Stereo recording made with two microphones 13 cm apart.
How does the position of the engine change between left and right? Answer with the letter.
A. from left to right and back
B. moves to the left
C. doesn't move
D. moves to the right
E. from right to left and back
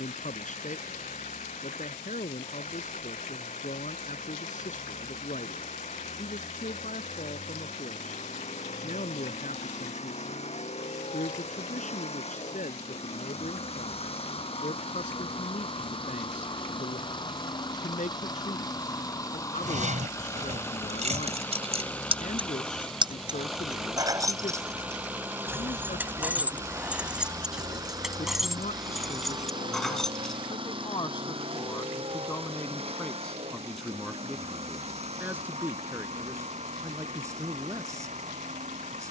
D.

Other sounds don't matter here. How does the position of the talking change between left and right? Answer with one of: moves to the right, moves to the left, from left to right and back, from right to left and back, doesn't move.
moves to the right.